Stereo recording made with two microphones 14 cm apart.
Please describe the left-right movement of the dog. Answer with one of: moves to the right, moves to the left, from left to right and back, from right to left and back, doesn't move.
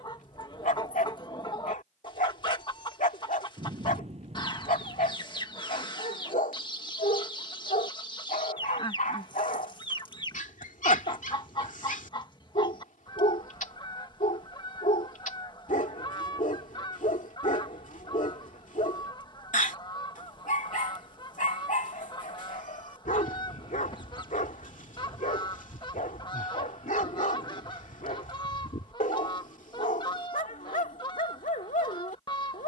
doesn't move.